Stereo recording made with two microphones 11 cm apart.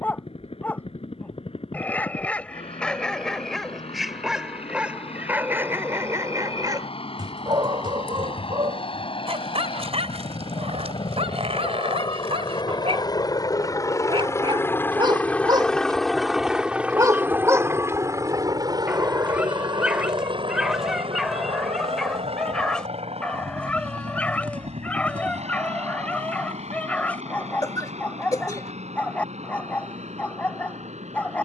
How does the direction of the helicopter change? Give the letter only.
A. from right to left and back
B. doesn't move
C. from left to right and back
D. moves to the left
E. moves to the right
E.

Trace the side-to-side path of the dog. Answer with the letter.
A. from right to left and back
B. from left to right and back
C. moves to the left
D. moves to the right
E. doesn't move
B.